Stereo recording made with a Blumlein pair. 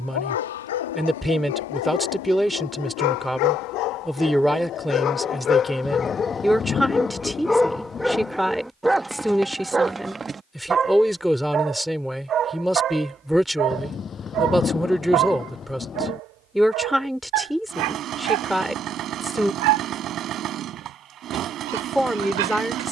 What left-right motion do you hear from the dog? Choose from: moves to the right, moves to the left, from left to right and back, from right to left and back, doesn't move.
moves to the right.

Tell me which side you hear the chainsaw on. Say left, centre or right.
right.